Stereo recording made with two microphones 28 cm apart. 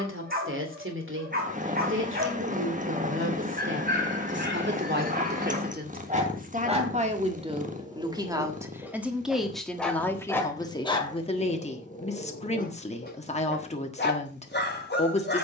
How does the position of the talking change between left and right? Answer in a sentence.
In this clip you hear the talking go from the right side to the left.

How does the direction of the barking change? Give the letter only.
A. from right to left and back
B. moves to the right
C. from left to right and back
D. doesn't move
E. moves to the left
E.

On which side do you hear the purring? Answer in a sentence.
You can hear the purring on the right.